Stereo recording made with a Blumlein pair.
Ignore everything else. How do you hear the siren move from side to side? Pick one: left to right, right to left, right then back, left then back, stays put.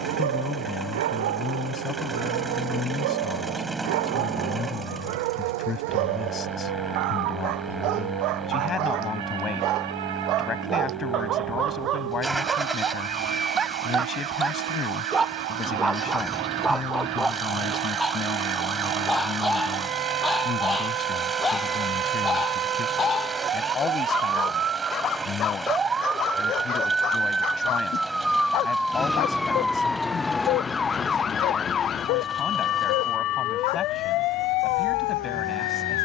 right to left.